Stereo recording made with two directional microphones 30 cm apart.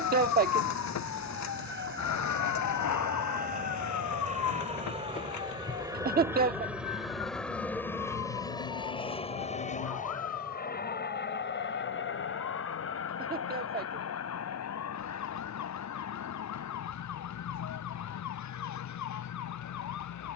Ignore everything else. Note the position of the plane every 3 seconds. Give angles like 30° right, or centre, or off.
40° right, 20° right, centre, 30° left, 50° left, 60° left, 60° left.